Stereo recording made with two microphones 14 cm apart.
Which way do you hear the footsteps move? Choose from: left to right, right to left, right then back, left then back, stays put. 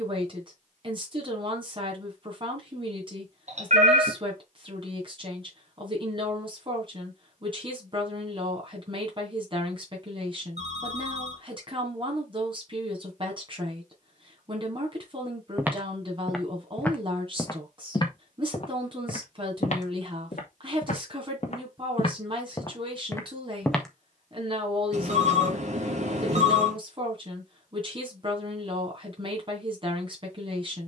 left then back.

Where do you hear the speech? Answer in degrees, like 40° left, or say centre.
40° right.